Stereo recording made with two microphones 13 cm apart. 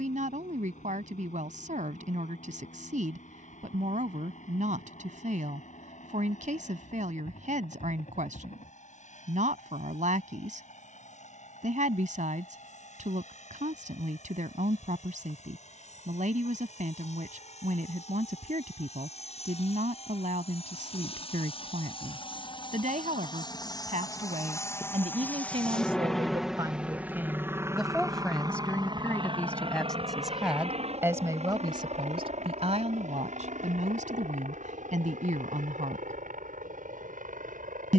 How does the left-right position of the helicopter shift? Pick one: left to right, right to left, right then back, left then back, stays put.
left to right.